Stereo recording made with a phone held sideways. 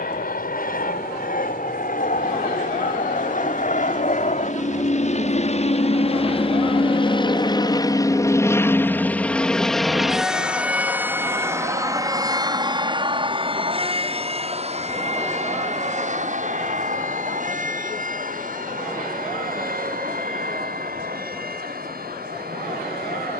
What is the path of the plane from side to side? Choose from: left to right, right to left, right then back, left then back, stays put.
left to right.